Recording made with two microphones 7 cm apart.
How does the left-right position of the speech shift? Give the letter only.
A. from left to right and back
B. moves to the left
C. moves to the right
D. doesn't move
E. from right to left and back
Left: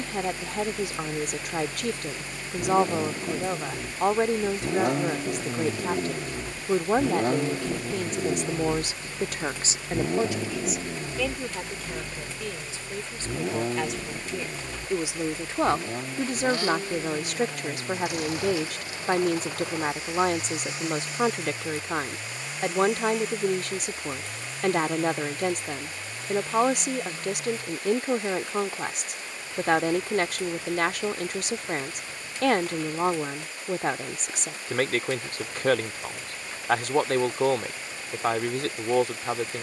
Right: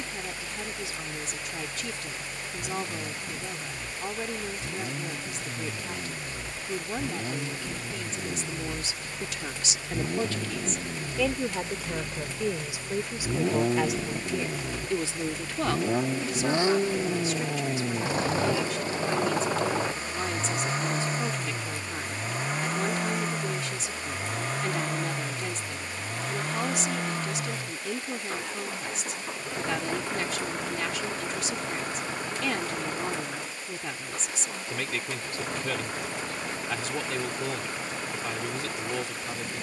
A.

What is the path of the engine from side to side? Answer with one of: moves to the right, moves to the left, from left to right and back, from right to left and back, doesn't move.
moves to the right.